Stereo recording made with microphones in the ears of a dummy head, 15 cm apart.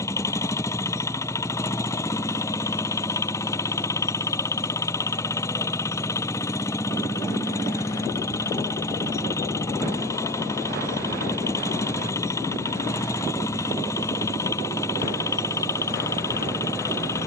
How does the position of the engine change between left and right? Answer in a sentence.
You can hear the engine stay put.